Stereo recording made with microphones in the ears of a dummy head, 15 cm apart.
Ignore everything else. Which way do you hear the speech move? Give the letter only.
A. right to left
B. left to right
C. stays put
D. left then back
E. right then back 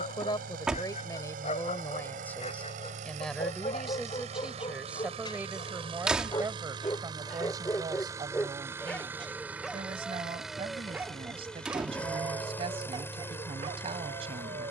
B.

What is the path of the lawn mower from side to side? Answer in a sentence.
You can hear the lawn mower go from the right side to the left.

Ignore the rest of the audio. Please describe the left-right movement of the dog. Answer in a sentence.
In this clip you hear the dog move from left to right.